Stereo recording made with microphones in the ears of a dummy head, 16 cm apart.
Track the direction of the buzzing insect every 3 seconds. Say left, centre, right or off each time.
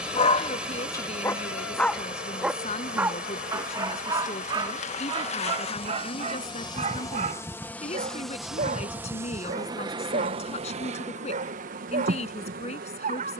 left, left, centre, right, right.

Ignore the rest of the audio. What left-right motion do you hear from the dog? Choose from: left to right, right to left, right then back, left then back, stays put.
left to right.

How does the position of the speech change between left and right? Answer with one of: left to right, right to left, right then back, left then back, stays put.
stays put.